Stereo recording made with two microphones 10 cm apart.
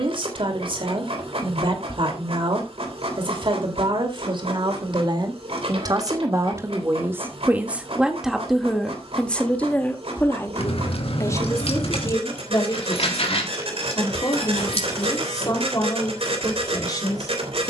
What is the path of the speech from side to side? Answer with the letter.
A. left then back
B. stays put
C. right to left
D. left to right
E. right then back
C.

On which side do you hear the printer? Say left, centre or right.
right.